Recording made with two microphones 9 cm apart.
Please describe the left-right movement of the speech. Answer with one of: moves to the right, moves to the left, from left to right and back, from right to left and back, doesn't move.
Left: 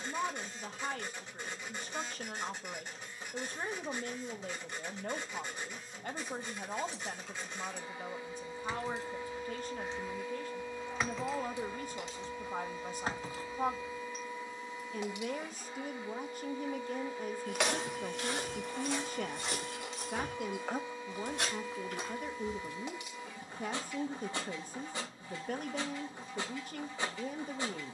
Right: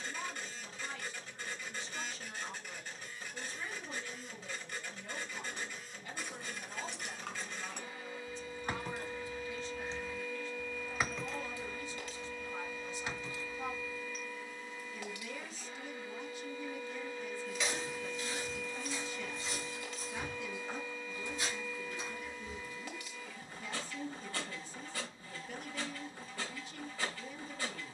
doesn't move.